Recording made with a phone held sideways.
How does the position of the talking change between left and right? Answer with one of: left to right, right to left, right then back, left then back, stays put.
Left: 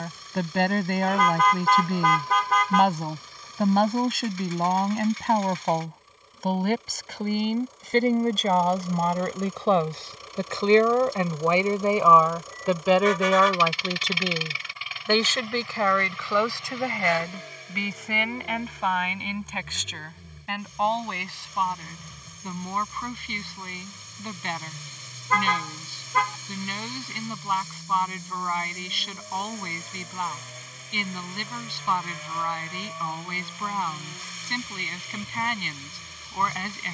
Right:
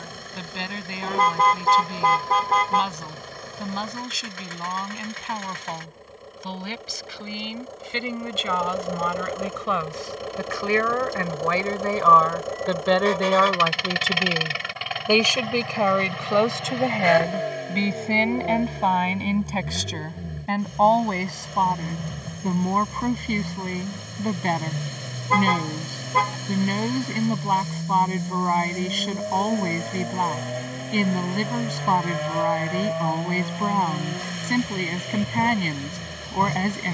left to right.